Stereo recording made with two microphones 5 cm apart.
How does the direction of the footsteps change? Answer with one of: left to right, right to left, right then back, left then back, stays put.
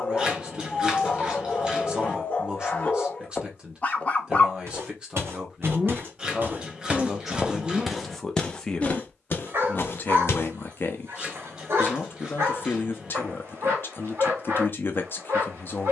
right to left.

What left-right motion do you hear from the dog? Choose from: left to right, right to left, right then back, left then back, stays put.
left to right.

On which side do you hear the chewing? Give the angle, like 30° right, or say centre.
20° right.